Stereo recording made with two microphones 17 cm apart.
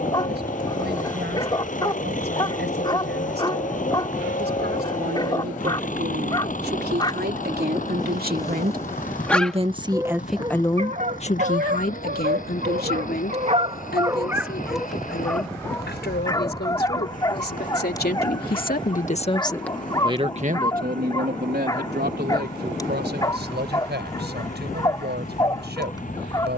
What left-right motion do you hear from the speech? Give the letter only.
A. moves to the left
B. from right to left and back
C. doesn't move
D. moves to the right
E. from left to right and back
B.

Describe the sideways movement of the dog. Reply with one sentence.
You can hear the dog move from left to right and back again.